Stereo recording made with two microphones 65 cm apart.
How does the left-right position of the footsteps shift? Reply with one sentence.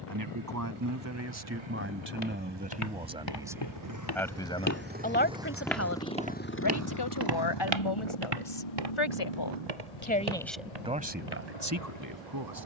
In this clip you hear the footsteps move from left to right.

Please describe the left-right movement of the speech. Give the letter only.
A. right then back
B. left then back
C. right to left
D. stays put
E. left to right
B.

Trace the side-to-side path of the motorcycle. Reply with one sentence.
You can hear the motorcycle move to the left.